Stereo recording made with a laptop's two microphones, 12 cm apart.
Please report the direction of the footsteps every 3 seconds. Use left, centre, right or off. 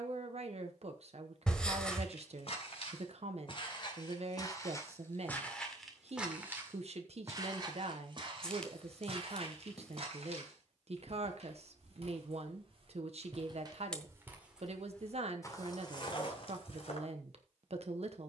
left, left, right, right, right, left.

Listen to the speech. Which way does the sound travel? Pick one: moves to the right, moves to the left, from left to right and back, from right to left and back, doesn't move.
doesn't move.